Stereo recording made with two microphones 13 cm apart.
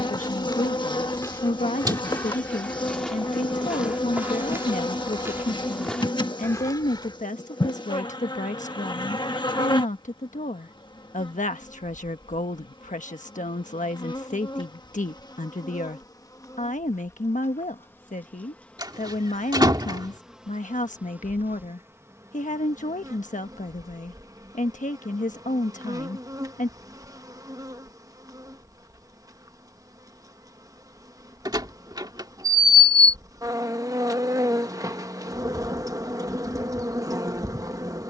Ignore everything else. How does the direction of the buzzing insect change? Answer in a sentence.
You can hear the buzzing insect go from the left side to the right.